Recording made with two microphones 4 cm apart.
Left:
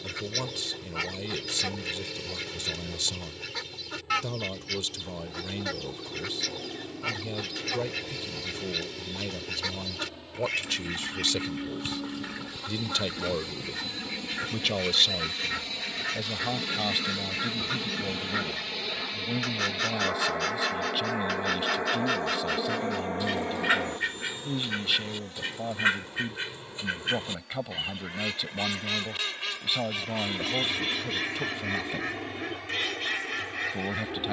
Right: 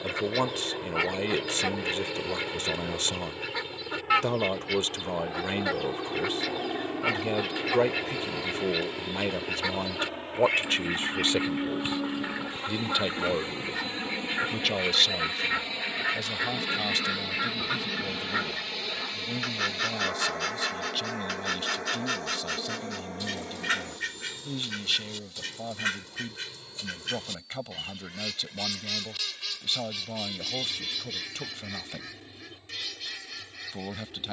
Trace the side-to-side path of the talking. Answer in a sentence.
You can hear the talking move from right to left.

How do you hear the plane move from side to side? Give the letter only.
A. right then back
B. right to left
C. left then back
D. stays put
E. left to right
B.